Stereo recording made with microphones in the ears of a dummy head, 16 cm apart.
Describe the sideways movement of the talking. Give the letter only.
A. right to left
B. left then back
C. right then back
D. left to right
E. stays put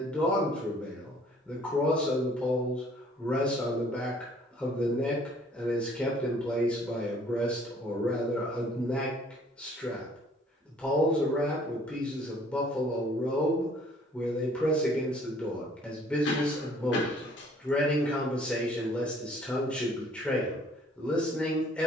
E.